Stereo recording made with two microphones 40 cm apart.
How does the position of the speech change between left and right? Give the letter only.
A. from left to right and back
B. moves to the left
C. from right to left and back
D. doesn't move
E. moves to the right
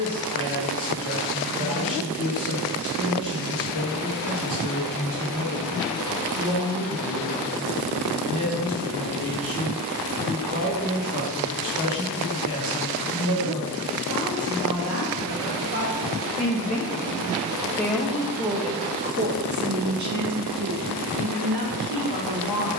E.